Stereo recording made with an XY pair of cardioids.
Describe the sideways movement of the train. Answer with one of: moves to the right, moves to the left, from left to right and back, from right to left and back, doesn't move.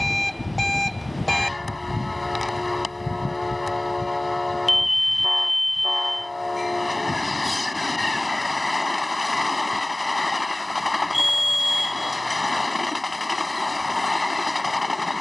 doesn't move.